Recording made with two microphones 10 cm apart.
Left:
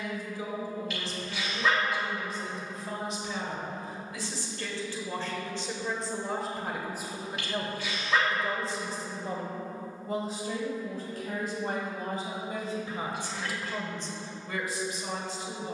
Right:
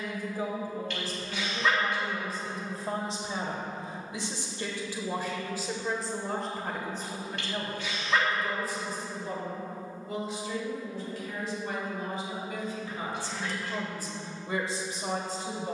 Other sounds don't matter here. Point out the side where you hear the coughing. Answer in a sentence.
In this clip you hear the coughing in the centre.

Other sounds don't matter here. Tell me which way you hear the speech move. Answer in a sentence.
In this clip you hear the speech move from right to left and back again.